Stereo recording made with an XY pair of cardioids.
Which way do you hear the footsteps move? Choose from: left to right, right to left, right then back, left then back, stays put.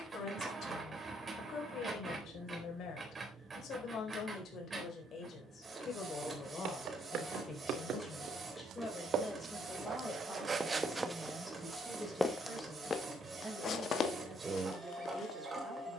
right to left.